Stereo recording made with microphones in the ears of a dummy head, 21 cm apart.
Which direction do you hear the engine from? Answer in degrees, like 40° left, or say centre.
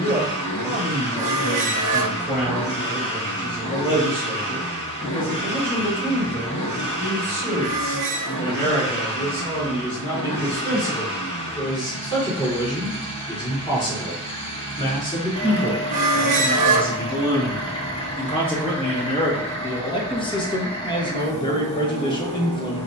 30° left.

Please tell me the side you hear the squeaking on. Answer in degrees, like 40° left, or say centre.
30° right.